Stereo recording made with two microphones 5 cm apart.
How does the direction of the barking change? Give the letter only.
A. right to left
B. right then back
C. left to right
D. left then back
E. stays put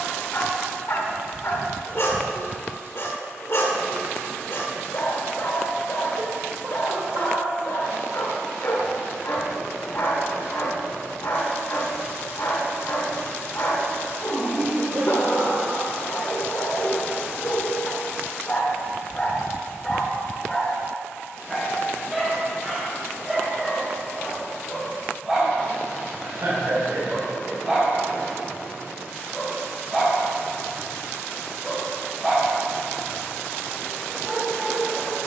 C.